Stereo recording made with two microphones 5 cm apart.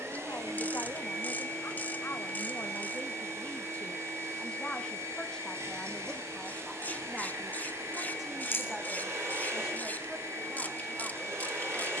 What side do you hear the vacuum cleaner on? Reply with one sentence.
You can hear the vacuum cleaner on the right.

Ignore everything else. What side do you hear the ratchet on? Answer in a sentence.
You can hear the ratchet on the left.